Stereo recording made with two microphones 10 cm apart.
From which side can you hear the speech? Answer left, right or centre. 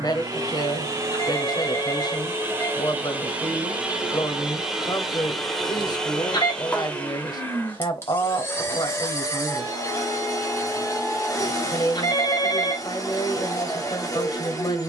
left.